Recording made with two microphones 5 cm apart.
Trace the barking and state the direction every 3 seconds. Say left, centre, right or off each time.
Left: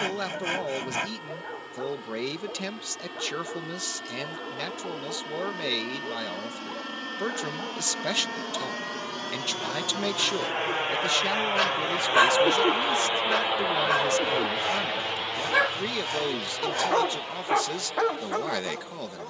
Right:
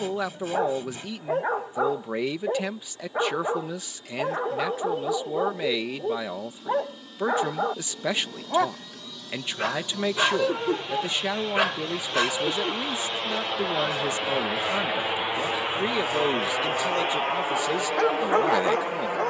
right, right, right, right, left, left, right.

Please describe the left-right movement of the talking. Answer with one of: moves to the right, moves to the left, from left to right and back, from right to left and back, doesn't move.
doesn't move.